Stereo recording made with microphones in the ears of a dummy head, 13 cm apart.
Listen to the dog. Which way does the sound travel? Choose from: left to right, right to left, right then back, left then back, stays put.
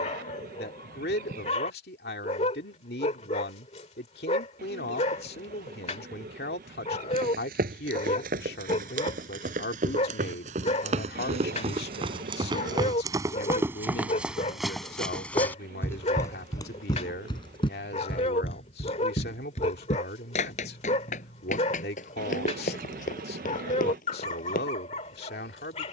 stays put.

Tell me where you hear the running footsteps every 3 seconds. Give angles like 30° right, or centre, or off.
off, off, 70° right, 50° right, 20° right, 20° left, 50° left, 60° left, 60° left.